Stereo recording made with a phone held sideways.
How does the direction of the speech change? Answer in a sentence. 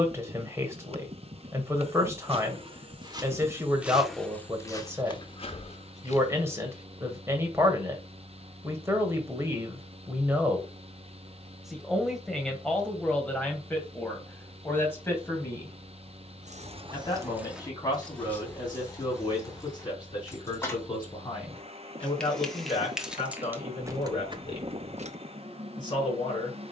In this clip you hear the speech move to the left.